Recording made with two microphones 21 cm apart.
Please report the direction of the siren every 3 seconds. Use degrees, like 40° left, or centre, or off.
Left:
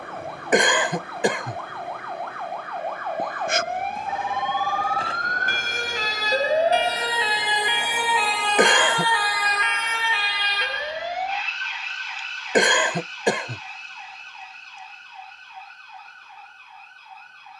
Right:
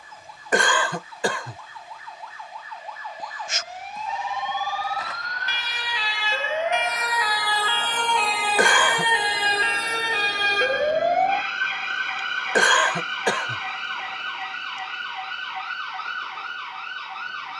70° left, 60° left, 20° left, 40° right, 70° right, 80° right.